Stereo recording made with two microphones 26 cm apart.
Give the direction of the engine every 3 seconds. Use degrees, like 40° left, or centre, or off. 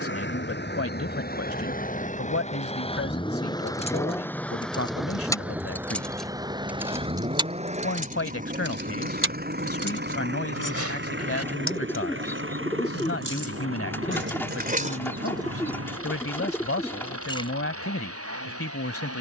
30° left, 10° left, 20° right, 40° right, 50° right, 60° right, 60° right.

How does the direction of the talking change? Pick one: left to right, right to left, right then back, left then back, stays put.
stays put.